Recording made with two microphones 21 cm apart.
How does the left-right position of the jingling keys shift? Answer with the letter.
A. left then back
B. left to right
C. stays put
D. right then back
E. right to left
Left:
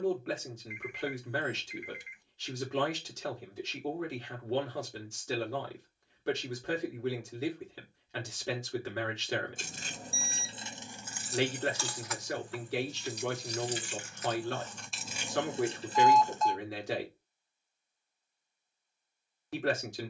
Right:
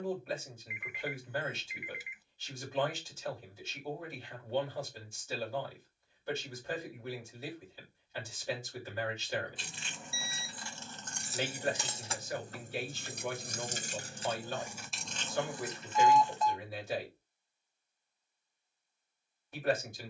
D.